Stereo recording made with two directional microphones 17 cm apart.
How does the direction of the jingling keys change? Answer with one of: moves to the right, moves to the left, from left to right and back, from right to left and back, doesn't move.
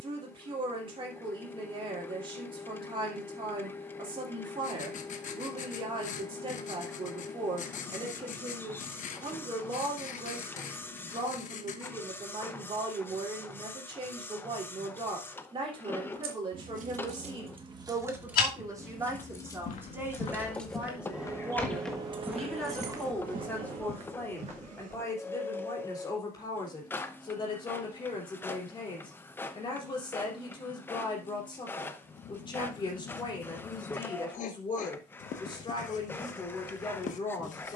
from right to left and back.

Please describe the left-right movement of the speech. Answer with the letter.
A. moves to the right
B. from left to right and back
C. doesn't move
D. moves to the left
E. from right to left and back
D.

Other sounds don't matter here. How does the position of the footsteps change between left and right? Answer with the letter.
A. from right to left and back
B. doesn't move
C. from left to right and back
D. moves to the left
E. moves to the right
E.